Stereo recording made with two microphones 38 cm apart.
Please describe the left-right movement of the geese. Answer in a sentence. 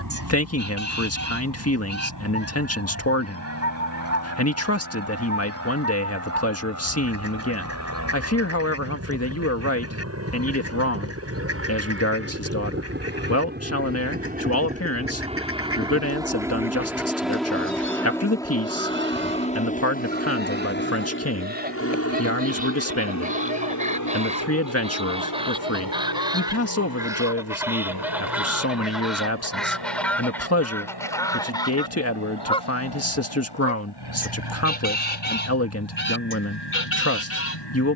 You can hear the geese go from the right side to the left.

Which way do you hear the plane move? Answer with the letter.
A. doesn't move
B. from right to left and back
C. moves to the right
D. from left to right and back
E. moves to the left
E.